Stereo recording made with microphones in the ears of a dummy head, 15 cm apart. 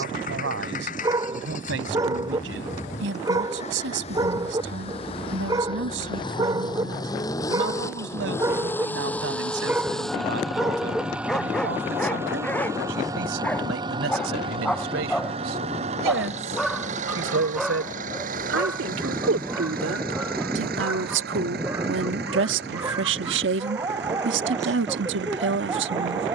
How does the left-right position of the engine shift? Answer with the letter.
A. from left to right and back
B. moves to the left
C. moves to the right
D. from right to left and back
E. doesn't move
C.